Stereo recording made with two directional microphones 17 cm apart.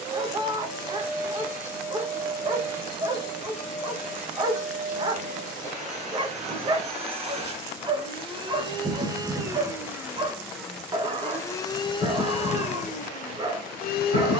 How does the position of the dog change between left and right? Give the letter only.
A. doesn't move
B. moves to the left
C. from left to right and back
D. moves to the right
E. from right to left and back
A.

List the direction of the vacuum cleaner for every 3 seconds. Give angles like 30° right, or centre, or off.
50° right, 50° right, 40° right, centre, 50° left.